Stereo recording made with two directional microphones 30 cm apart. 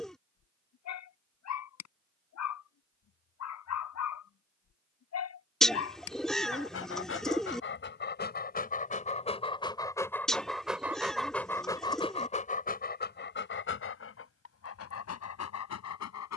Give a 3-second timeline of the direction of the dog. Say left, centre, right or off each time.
left, left, left, centre, left, left.